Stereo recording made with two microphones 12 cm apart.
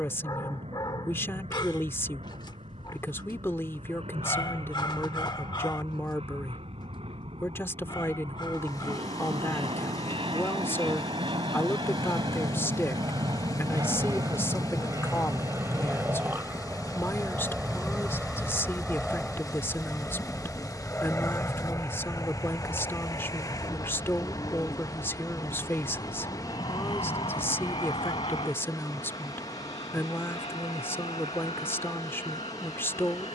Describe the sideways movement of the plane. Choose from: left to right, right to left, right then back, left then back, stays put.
right to left.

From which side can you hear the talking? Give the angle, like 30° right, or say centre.
20° left.